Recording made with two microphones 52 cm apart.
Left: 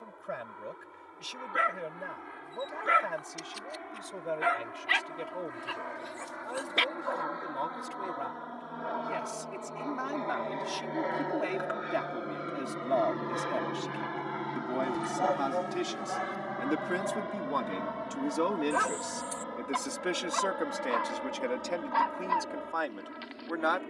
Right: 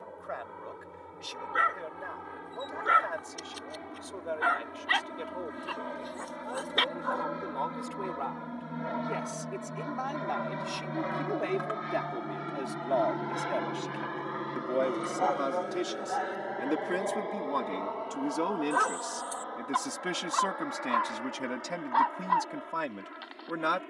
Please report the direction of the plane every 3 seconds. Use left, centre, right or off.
right, right, right, right, centre, left, left, left.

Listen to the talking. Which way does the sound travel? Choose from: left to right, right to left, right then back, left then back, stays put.
left to right.